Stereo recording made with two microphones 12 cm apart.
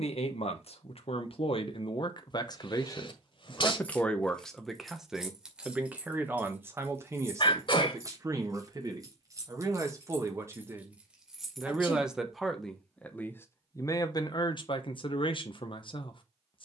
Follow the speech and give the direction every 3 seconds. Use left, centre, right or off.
left, centre, right, right, left, left.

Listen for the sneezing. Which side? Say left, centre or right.
left.